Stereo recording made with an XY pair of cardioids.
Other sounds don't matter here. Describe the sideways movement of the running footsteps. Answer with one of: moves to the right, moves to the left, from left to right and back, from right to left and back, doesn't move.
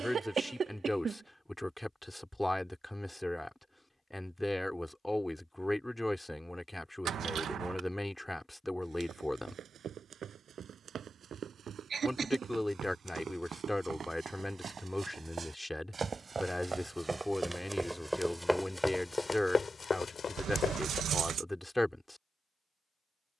moves to the left.